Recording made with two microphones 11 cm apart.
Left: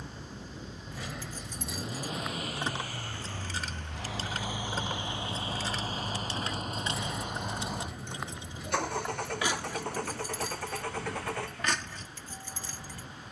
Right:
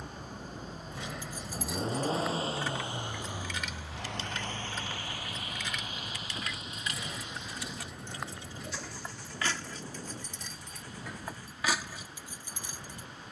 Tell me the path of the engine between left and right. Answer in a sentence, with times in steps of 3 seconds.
In this clip you hear the engine on the right from 0 s, in the centre from 3 s, on the left from 6 s and not at all from 12 s.